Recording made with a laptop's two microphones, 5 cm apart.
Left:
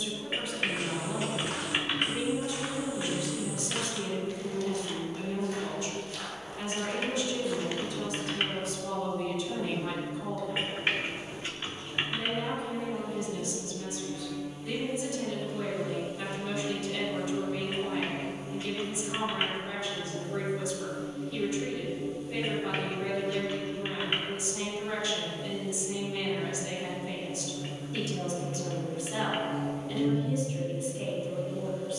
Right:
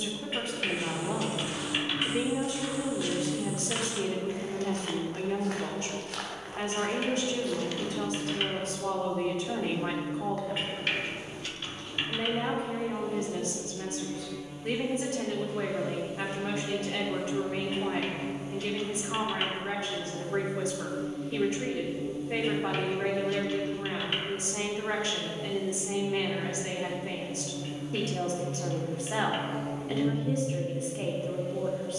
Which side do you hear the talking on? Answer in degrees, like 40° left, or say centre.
40° right.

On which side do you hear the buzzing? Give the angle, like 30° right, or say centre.
30° right.